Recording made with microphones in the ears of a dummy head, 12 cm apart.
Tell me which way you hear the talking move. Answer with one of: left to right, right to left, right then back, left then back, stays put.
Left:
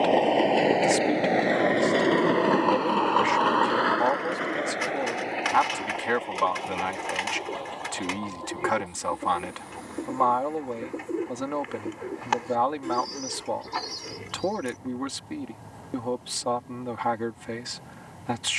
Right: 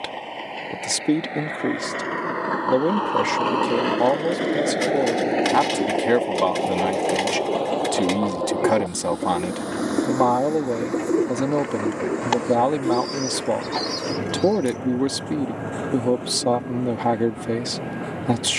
stays put.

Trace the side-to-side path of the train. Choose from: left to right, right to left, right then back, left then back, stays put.
left to right.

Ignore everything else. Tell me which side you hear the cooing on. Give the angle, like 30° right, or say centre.
40° right.